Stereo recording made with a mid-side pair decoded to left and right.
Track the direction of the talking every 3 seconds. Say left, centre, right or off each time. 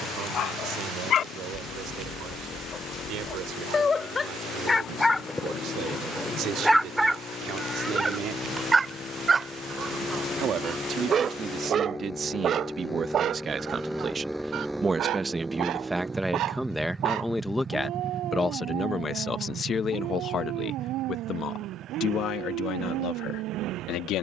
right, right, right, right, right, centre, left, left.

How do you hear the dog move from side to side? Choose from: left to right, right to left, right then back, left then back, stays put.
left to right.